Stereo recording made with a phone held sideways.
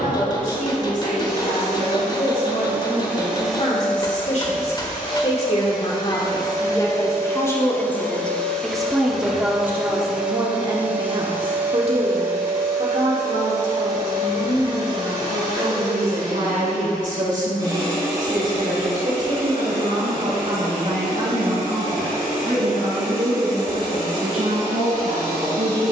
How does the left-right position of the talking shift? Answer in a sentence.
In this clip you hear the talking move to the right.